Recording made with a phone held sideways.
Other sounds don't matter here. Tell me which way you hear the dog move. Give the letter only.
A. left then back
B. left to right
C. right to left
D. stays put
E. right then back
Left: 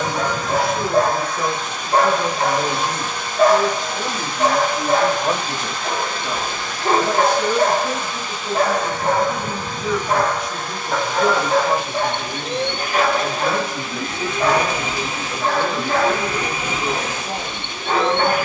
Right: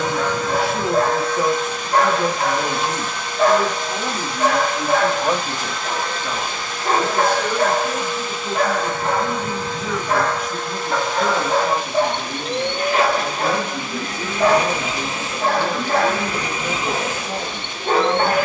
B.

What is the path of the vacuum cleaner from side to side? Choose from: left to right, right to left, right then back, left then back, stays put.
stays put.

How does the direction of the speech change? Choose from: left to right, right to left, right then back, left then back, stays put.
right to left.